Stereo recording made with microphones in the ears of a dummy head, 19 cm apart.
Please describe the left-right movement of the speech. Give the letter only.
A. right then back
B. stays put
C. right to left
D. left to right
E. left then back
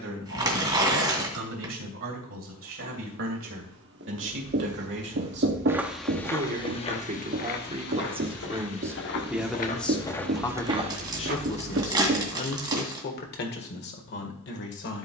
C.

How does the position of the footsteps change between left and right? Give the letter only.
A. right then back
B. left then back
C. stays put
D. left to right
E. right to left
B.